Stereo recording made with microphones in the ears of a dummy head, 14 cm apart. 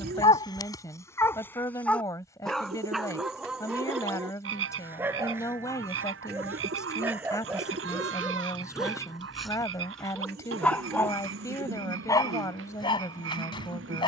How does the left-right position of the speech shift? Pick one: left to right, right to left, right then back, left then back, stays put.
stays put.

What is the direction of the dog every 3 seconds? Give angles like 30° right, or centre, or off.
20° left, 10° right, 10° right, 10° left, 30° left.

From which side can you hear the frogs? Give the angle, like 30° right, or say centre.
80° right.